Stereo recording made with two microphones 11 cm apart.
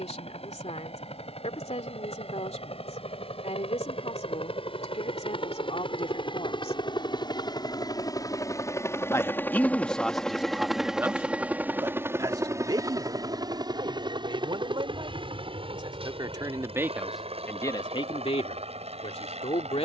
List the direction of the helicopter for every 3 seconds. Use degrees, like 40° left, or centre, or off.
70° left, 60° left, 40° left, centre, 40° right, 50° right, 60° right.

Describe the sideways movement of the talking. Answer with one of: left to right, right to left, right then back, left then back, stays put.
right then back.